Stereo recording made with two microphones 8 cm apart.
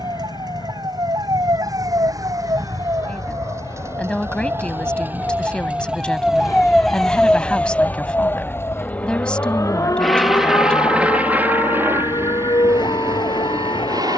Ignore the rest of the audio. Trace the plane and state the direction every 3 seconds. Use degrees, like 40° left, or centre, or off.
70° left, 60° left, 40° left, 10° right, 40° right.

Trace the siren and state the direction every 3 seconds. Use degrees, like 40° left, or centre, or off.
50° right, 30° right, 10° left, 50° left, 70° left.